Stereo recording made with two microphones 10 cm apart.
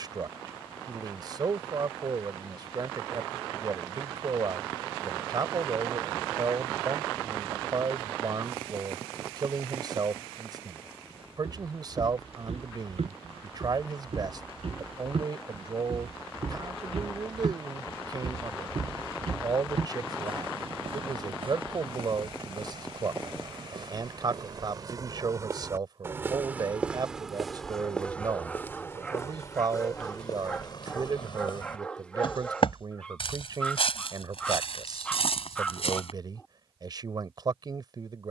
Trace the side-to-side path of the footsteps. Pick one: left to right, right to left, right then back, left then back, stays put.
right to left.